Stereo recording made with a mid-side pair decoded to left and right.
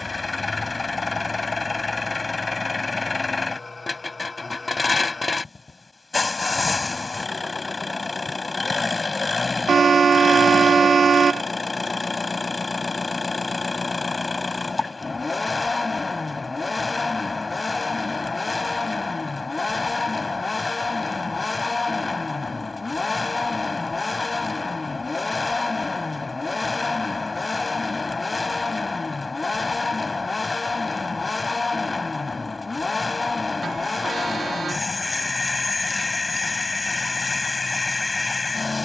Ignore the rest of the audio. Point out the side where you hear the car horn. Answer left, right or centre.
right.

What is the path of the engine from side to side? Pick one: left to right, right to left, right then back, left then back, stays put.
stays put.